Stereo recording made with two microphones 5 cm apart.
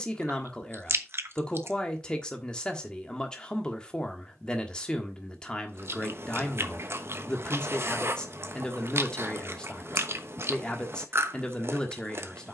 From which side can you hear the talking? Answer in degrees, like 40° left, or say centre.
20° left.